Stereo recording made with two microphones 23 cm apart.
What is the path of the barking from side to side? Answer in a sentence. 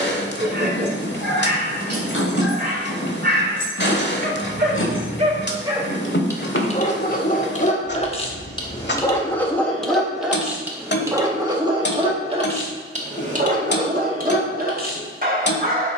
You can hear the barking go left and come back.